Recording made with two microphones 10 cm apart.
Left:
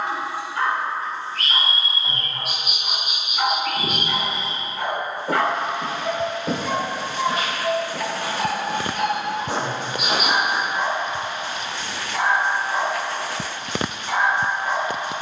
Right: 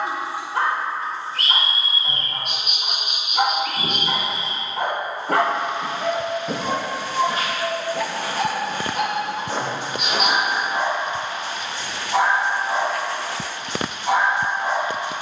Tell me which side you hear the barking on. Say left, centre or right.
right.